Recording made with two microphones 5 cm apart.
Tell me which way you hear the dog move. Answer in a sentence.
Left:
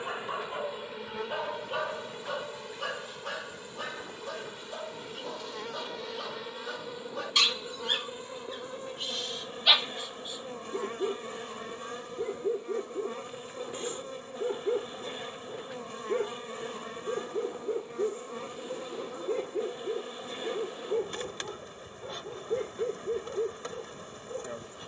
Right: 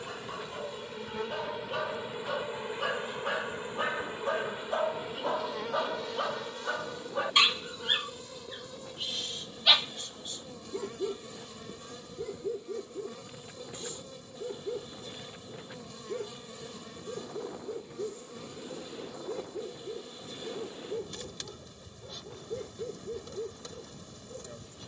You can hear the dog go right and come back.